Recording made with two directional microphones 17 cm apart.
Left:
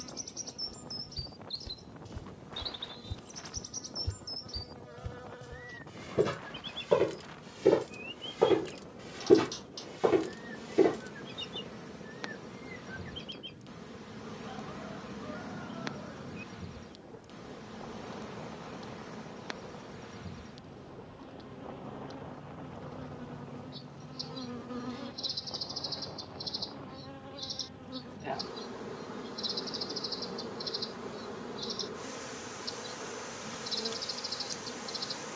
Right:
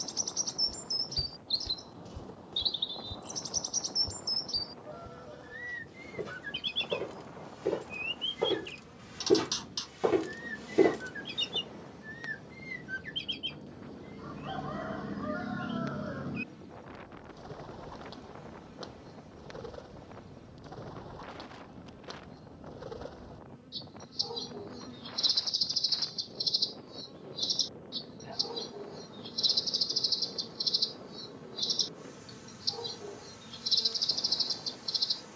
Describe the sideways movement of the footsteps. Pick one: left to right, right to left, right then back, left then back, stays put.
left then back.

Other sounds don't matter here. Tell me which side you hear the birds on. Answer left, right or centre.
right.